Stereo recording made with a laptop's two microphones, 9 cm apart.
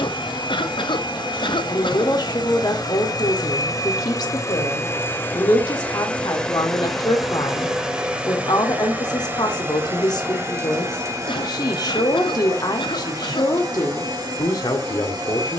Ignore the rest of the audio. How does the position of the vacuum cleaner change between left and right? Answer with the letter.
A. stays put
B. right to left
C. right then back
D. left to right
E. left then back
D.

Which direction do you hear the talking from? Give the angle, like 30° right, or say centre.
50° left.